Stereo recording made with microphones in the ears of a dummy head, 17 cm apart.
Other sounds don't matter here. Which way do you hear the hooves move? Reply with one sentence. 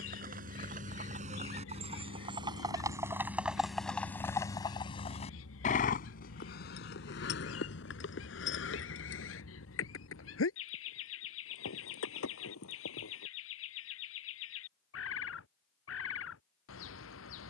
In this clip you hear the hooves travel towards the left.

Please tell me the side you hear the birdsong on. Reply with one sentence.
You can hear the birdsong on the left.